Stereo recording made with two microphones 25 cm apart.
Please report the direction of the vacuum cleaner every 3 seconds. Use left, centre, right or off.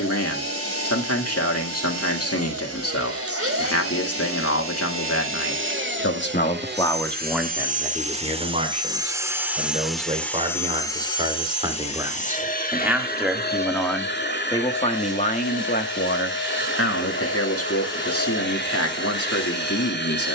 right, right, right, centre, left, left, left.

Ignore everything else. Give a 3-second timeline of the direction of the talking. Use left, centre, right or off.
left, left, centre, right, centre, left, left.